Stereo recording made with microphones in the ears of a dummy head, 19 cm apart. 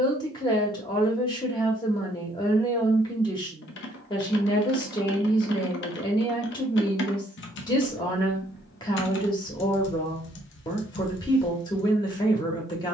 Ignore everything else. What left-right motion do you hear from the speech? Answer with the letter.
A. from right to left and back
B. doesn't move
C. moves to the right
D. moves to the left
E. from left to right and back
B.